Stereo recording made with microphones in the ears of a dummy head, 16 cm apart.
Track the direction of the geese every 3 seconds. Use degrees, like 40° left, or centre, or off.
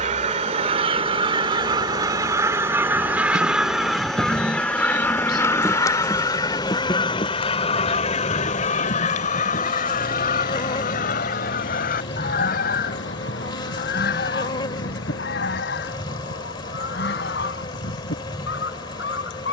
30° right, 10° left, 30° left, 50° left, 60° left, 60° left, 60° left.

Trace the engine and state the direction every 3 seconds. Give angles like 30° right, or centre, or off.
40° right, 10° right, 30° left, 50° left, 70° left, 70° left, 80° left.